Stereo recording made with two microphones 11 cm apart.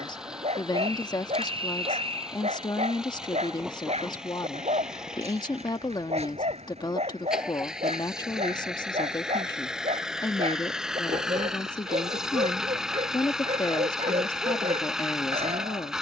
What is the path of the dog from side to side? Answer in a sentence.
You can hear the dog stay put.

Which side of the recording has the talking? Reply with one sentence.
You can hear the talking on the left.